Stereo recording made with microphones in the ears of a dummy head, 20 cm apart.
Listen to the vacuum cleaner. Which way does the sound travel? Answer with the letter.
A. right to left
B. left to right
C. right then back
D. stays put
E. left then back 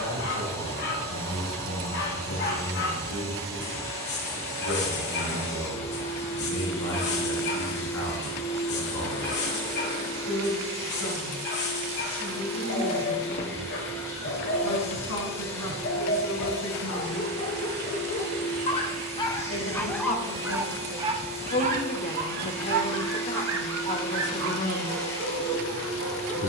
D.